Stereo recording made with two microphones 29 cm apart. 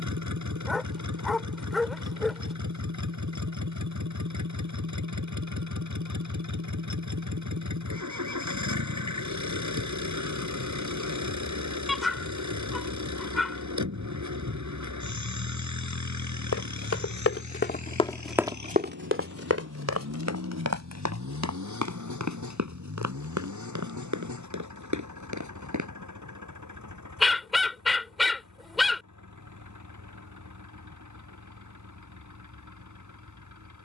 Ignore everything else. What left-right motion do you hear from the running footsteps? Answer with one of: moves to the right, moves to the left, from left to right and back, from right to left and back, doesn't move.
moves to the right.